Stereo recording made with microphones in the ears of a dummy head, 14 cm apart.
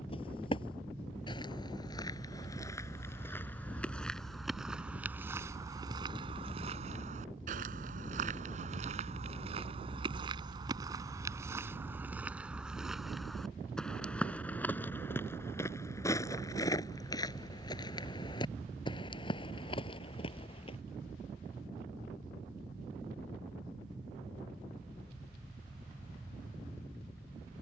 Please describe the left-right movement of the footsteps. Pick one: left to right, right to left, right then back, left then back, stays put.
right then back.